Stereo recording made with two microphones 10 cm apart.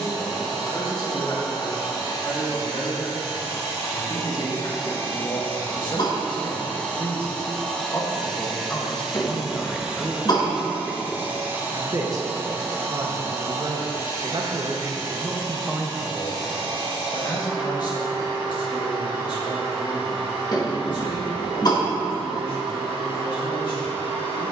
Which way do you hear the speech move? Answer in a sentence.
You can hear the speech move from left to right and back again.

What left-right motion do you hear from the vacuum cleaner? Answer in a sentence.
You can hear the vacuum cleaner go from the left side to the right.